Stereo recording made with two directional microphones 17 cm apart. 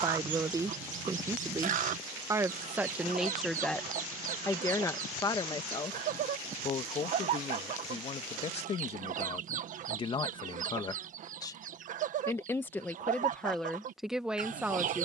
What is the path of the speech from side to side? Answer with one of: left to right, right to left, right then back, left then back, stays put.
left then back.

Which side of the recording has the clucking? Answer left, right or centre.
right.